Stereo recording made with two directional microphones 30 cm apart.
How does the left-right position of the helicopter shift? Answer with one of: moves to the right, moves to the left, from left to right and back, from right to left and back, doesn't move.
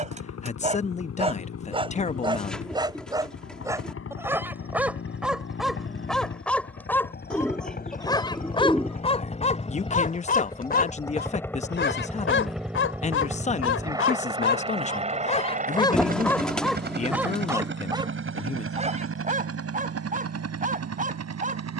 moves to the right.